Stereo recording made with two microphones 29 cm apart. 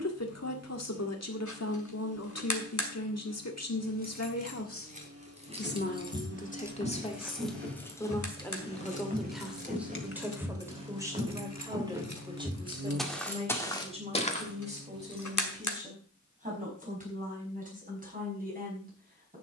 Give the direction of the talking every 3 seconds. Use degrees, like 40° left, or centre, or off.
60° left, 50° left, 20° left, 10° right, 20° right, 30° right, 30° right.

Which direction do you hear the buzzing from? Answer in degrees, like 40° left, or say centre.
50° right.